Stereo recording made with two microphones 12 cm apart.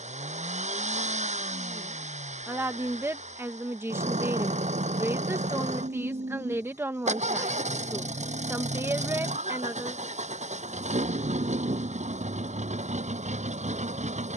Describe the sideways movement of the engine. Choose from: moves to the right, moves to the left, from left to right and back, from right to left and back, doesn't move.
doesn't move.